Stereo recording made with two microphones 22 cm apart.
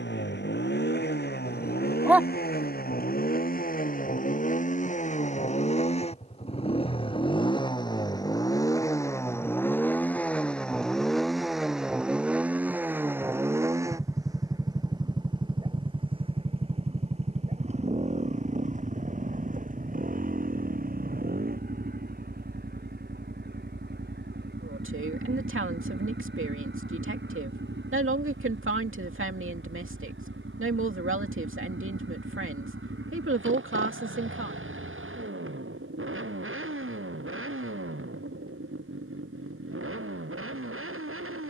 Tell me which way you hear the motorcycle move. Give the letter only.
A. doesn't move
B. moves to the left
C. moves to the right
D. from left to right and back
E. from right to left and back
C.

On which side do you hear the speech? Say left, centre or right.
right.